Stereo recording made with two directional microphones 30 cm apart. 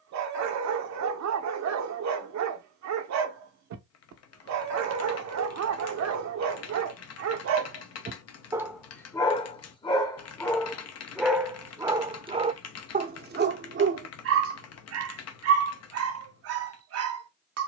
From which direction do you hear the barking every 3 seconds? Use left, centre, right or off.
right, right, right, centre, right, right.